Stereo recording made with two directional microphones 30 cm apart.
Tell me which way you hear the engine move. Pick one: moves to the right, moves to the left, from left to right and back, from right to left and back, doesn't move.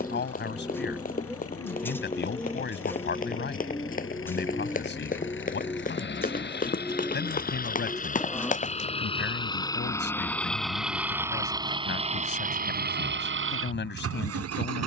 moves to the right.